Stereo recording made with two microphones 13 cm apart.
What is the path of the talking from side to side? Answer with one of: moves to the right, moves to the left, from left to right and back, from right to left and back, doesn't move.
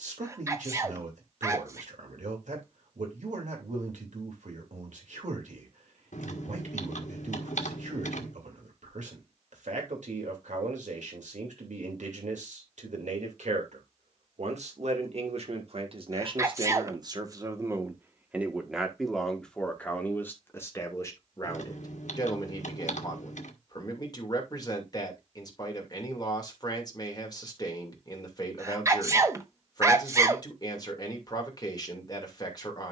moves to the left.